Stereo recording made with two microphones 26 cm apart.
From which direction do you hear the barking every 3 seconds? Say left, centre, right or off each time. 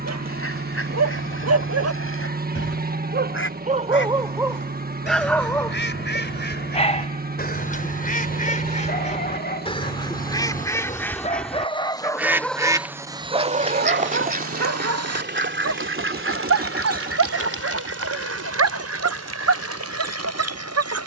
right, centre, left, left, right, right, right.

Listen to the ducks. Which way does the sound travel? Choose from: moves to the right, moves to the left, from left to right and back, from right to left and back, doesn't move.
moves to the right.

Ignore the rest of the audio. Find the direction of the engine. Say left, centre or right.
right.